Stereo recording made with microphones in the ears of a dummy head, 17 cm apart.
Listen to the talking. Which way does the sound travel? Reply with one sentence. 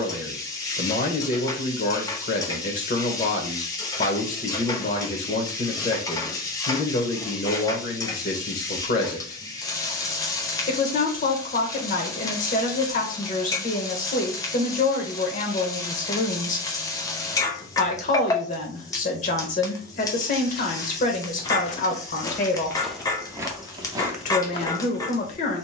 You can hear the talking stay in one place.